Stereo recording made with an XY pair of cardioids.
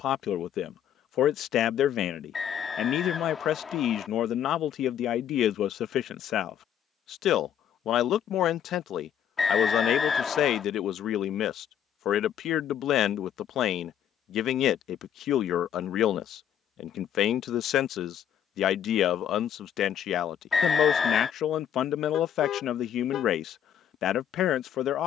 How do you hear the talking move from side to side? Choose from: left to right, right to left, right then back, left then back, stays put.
stays put.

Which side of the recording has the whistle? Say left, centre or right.
left.